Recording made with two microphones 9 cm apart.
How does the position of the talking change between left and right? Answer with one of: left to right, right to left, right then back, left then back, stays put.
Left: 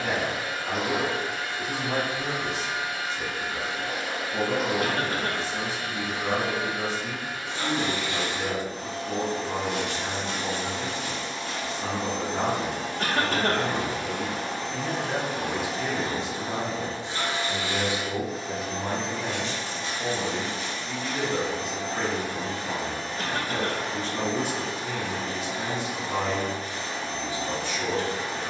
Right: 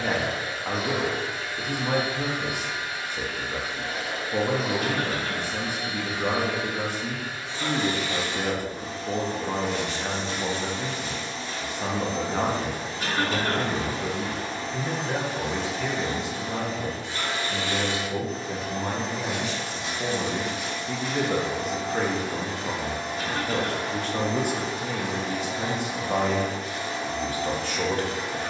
left then back.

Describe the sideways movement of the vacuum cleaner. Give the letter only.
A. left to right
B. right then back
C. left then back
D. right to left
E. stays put
A.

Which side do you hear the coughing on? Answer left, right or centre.
left.